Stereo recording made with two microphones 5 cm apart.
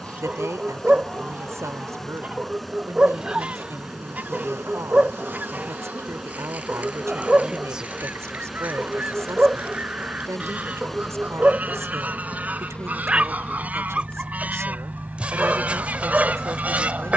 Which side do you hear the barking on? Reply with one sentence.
You can hear the barking on the right.